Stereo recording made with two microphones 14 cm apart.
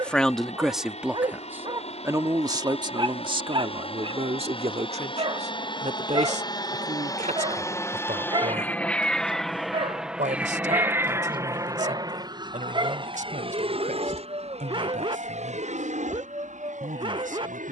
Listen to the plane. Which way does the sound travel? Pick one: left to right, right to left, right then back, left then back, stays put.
left to right.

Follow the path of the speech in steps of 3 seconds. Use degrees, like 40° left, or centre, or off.
10° right, 50° right, 60° right, 70° right, 70° right, 80° right.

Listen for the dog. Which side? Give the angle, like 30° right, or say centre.
40° right.